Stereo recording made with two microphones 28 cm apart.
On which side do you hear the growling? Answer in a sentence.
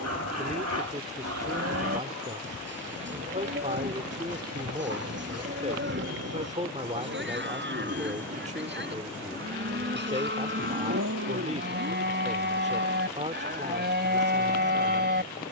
In this clip you hear the growling on the right.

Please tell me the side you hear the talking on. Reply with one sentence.
In this clip you hear the talking on the right.